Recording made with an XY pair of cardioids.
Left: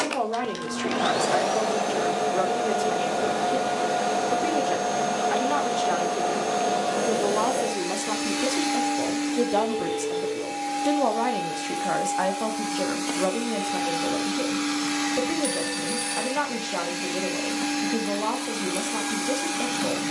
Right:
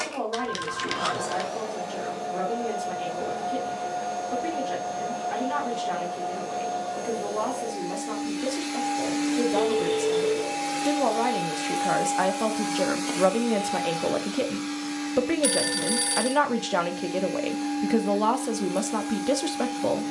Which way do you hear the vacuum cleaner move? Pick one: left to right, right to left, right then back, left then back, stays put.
right then back.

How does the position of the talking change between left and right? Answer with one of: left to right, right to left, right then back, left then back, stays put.
left to right.